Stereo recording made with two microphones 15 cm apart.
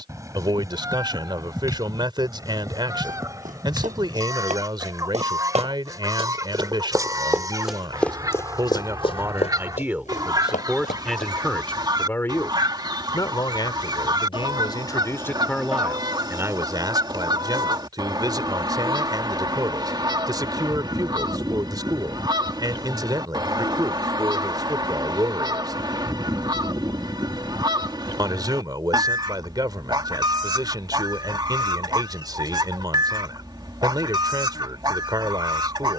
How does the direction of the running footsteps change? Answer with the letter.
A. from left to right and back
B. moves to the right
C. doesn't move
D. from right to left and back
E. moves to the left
E.